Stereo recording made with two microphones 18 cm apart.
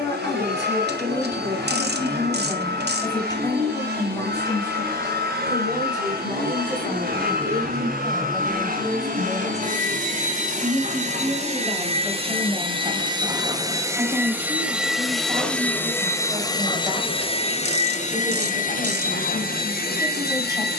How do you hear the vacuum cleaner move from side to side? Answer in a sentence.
You can hear the vacuum cleaner move to the left.